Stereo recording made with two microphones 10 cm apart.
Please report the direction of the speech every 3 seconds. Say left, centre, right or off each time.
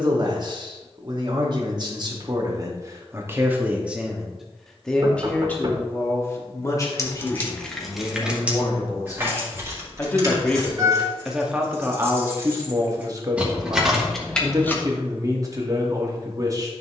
right, centre, left, centre, right, right.